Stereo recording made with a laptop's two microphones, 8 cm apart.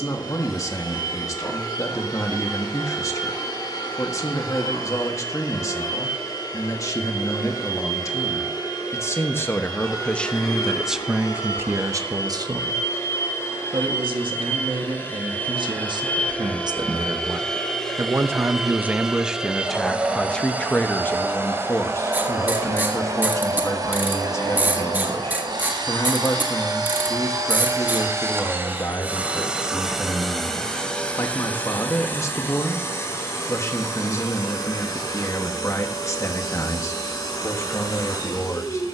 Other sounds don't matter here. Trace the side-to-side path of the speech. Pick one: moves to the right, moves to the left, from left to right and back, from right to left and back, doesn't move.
from left to right and back.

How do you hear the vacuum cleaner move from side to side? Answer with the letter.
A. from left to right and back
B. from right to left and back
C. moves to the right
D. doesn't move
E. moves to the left
A.